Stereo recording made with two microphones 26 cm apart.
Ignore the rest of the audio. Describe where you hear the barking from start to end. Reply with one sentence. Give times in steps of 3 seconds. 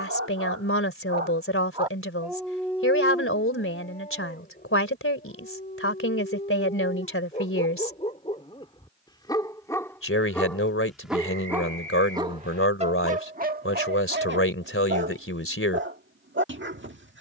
You can hear the barking on the right from 0 s, on the left from 3 s, in the centre from 9 s and on the right from 12 s.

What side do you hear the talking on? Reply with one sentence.
You can hear the talking on the left.